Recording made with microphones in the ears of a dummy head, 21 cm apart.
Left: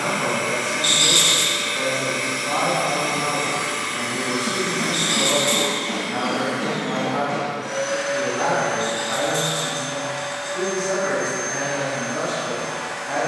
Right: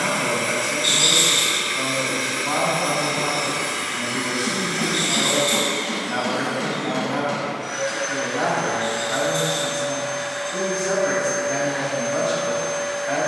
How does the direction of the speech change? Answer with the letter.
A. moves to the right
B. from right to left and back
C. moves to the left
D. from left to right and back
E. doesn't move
E.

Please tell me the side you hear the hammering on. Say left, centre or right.
right.